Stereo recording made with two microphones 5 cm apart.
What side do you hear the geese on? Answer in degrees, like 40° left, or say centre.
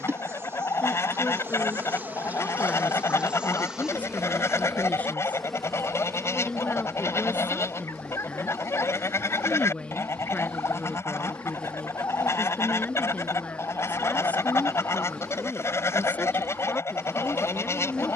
70° left.